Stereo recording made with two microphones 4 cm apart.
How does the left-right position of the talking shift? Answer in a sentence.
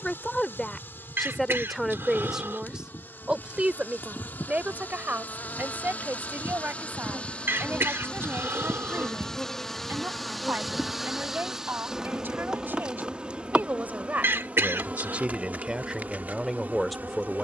In this clip you hear the talking move from left to right and back again.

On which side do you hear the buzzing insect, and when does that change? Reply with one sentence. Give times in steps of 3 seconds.
In this clip you hear the buzzing insect on the left from 0 s, in the centre from 9 s and on the right from 12 s.